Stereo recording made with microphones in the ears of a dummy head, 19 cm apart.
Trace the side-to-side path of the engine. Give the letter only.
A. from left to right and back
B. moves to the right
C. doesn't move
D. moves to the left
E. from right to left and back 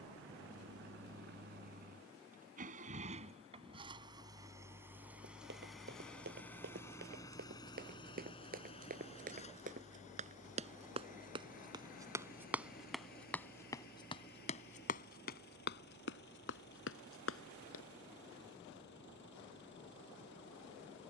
D.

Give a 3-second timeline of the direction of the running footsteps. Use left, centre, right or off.
off, right, right, right, centre, left, off.